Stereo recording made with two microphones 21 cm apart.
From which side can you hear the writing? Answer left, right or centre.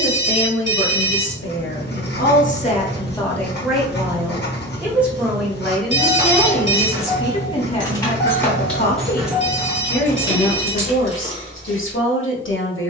left.